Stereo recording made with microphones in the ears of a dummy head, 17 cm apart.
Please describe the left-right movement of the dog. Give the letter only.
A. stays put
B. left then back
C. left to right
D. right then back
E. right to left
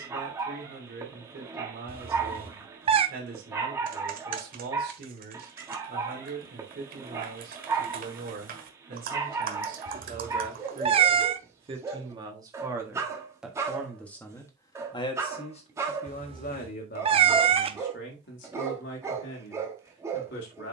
A.